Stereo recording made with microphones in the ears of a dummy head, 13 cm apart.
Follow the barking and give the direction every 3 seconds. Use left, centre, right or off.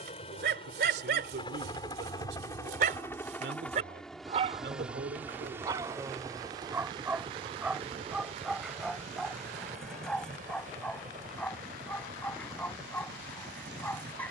right, right, centre, centre, centre.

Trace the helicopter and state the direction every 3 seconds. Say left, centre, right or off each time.
left, centre, right, right, right.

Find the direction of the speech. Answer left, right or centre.
right.